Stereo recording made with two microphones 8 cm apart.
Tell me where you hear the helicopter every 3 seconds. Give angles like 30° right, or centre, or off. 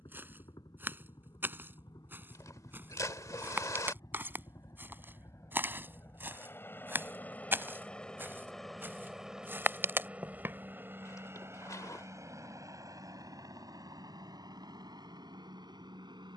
60° left, 50° left, 20° left, 20° right, 50° right, 60° right.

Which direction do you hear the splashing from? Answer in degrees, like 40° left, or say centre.
40° left.